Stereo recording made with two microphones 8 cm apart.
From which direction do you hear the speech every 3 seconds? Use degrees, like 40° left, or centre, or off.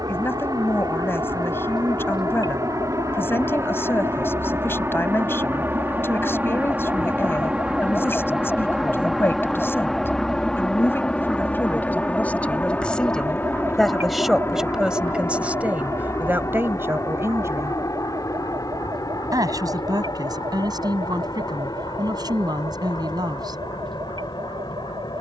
30° left, 30° left, 30° left, 30° left, 10° left, 20° right, 50° right, 60° right, off.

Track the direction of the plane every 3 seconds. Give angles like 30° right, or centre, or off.
50° right, 30° right, 10° right, 10° left, 20° left, 40° left, 40° left, 50° left, 50° left.